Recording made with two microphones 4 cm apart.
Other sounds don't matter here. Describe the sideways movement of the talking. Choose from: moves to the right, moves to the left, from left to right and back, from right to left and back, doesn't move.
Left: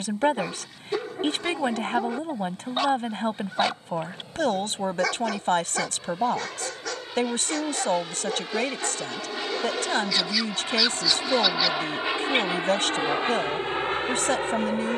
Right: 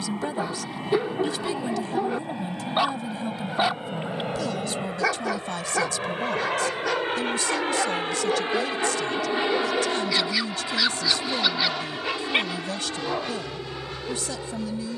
doesn't move.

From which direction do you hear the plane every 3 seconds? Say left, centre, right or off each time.
right, right, right, centre, left.